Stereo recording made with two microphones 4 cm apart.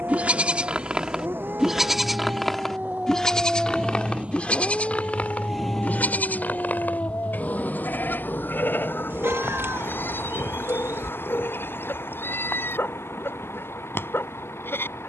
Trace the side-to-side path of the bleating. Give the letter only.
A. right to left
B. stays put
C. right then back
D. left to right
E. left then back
A.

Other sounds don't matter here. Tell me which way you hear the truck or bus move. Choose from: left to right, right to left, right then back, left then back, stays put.
right to left.